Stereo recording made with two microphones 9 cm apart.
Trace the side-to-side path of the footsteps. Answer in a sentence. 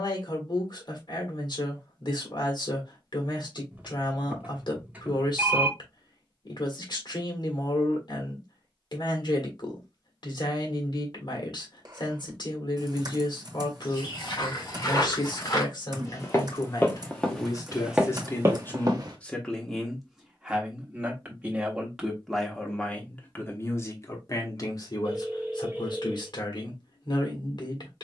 In this clip you hear the footsteps travel towards the right.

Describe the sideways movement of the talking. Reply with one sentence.
In this clip you hear the talking go right and come back.